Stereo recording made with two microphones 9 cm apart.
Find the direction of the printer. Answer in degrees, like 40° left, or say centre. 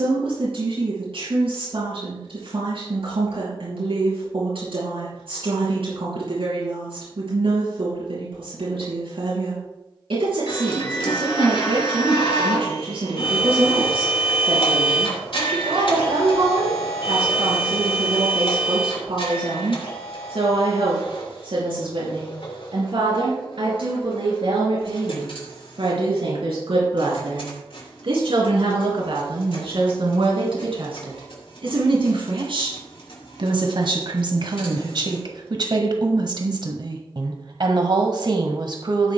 70° left.